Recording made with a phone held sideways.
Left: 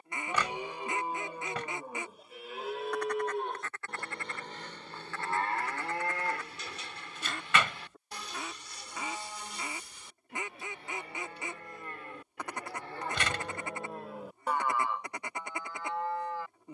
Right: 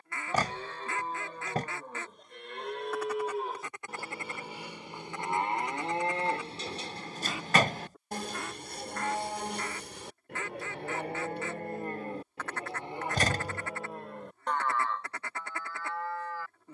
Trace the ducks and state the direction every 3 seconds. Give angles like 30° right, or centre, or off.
10° left, 20° right, centre, 10° left, 20° left, 20° left.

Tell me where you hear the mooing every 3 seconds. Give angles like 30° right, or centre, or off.
10° left, 10° right, 40° right, 60° right, 10° right, 20° left.